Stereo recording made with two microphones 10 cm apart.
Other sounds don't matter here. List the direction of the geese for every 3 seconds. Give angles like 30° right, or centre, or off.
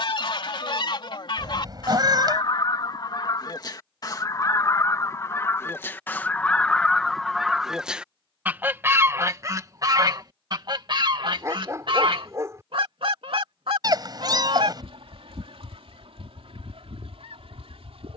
50° left, 30° left, centre, 40° right, 70° right, 80° right.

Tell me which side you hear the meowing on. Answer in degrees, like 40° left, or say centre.
40° right.